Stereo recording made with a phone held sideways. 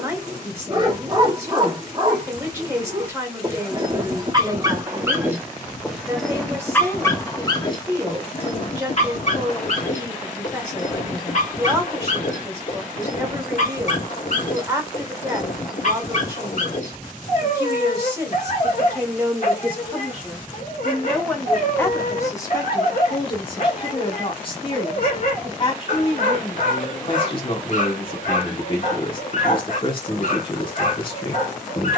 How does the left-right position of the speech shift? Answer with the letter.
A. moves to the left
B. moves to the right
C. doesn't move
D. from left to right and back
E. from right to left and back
A.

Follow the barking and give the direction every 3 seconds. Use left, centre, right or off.
right, right, left, left, left, left, left, left, left, left, left.